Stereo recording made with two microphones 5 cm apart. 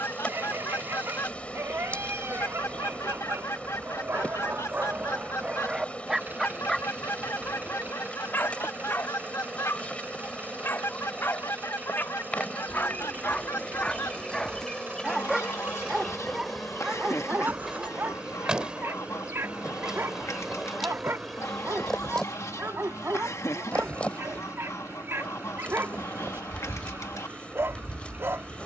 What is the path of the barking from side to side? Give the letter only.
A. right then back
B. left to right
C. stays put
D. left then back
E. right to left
D.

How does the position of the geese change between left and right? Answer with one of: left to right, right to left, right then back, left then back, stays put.
stays put.